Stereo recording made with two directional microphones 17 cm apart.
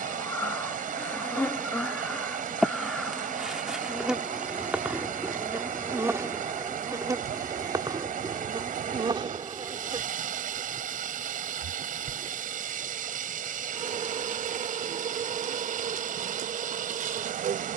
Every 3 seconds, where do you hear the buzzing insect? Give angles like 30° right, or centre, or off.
10° left, 10° right, 20° right, 30° right, 40° right, 50° right.